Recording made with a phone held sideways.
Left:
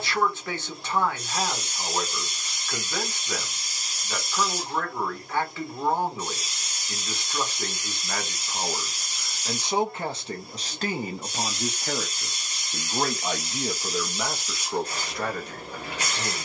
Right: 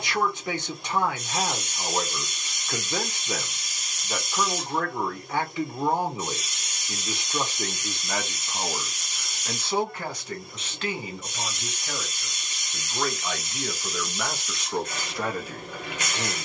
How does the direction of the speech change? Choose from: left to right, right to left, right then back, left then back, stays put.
left then back.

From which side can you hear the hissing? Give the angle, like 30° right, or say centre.
30° left.